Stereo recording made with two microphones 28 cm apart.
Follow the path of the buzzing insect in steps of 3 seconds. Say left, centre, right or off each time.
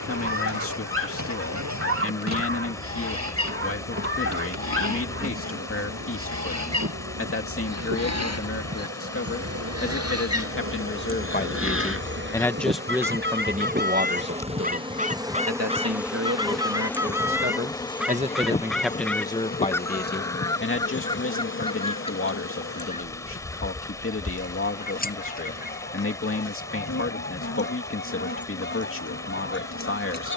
right, right, right, right, right, centre, left, left, left, left.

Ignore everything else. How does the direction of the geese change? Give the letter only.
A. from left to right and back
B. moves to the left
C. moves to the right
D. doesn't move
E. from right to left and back
B.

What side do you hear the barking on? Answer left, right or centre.
right.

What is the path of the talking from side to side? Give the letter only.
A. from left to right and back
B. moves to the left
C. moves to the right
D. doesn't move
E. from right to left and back
A.